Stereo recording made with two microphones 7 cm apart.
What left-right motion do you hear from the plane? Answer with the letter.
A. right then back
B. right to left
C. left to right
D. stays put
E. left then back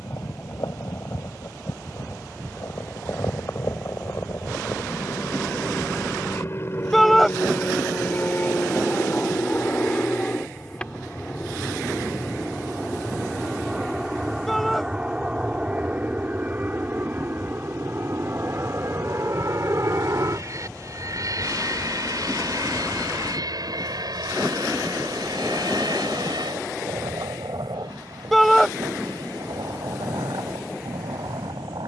C.